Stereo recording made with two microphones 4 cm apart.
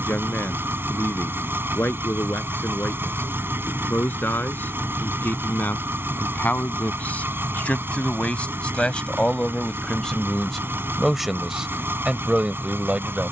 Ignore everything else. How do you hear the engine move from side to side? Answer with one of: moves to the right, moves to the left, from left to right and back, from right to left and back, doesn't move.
doesn't move.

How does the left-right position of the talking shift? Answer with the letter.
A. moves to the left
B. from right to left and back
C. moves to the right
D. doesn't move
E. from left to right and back
C.